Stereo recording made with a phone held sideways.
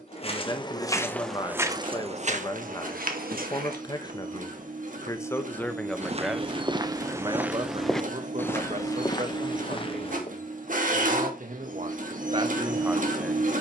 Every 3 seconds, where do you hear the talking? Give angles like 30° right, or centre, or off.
30° left, 20° left, 30° right, 60° right, 30° right.